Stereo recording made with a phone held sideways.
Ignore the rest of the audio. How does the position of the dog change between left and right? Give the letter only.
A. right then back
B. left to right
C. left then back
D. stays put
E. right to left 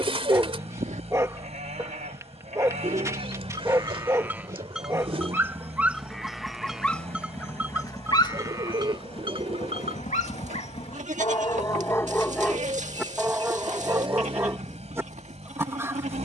C.